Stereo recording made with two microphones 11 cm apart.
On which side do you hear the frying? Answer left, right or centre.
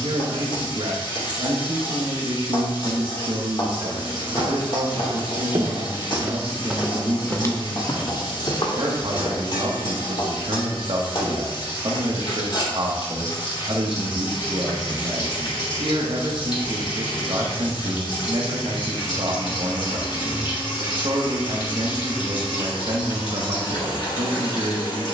left.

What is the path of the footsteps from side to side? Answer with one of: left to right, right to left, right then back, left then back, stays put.
right to left.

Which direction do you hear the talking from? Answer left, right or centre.
right.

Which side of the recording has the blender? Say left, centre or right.
left.